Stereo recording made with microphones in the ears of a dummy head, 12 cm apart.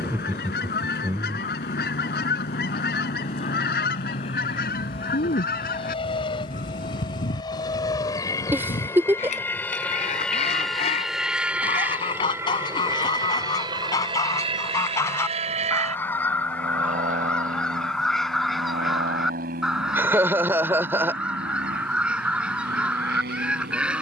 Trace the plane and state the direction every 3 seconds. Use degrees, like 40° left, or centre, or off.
60° left, 50° left, 30° left, centre, 30° right, 50° right, 60° right, 70° right.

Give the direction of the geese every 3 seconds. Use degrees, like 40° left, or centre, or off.
70° left, 70° left, 60° left, 40° left, 30° left, 10° left, centre, 10° right.